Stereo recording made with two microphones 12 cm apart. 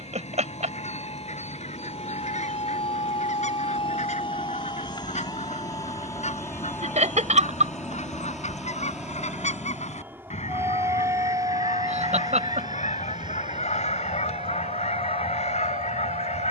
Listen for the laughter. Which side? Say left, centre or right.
right.